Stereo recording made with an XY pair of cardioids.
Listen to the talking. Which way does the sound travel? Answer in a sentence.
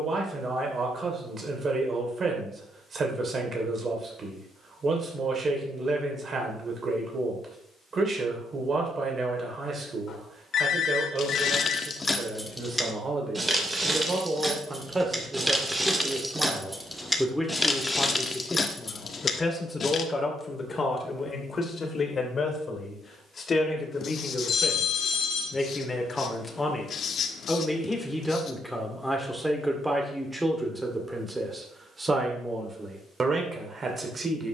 You can hear the talking move from right to left and back again.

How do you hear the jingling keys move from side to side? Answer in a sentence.
You can hear the jingling keys move from left to right and back again.